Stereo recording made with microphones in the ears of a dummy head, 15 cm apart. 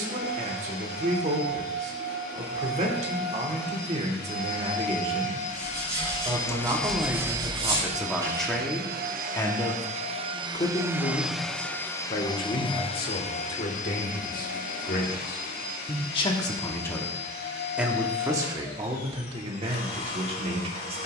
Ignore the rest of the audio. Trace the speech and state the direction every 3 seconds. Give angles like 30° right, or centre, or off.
40° right, 40° right, 10° right, 30° left, 50° left, 20° left, 30° right.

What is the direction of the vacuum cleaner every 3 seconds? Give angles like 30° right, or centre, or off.
60° left, 50° left, 20° right, 20° right, 40° left, 60° left, 60° left.